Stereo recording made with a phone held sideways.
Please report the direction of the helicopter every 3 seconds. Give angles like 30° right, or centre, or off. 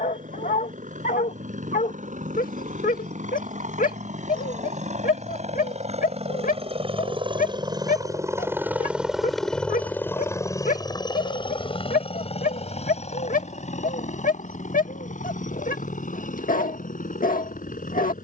80° right, 60° right, 30° right, 20° left, 50° left, 60° left.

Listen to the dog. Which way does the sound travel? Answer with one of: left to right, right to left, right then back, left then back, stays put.
stays put.